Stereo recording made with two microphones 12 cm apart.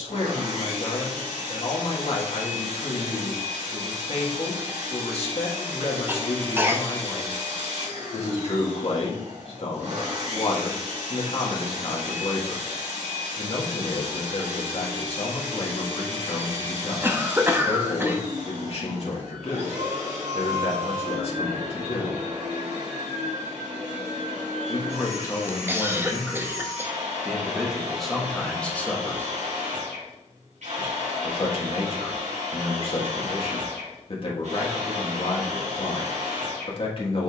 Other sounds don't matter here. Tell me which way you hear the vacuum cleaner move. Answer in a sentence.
In this clip you hear the vacuum cleaner stay in one place.